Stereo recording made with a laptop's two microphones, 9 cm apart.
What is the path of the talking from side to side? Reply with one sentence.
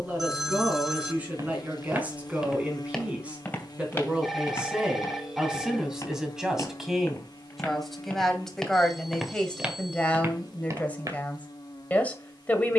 In this clip you hear the talking travel towards the left.